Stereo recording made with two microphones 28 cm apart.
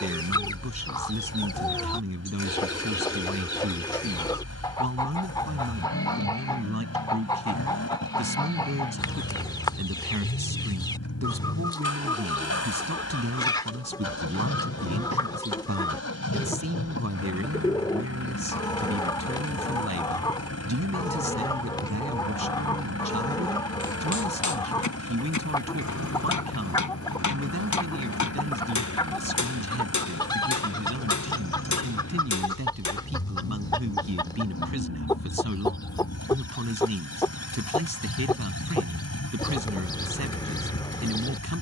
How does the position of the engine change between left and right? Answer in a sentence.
In this clip you hear the engine stay put.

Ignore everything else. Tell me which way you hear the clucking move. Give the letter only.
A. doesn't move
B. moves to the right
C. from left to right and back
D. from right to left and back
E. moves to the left
A.